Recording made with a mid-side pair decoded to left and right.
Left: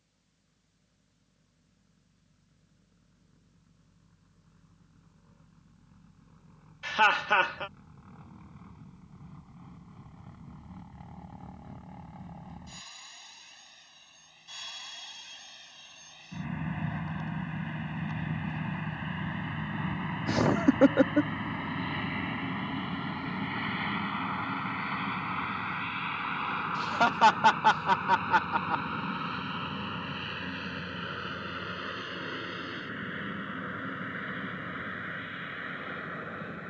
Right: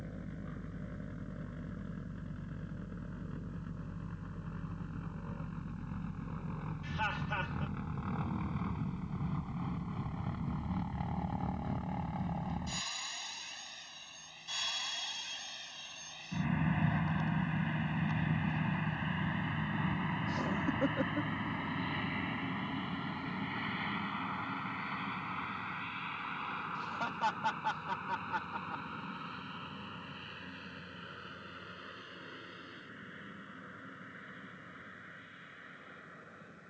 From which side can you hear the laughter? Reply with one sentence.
In this clip you hear the laughter on the left.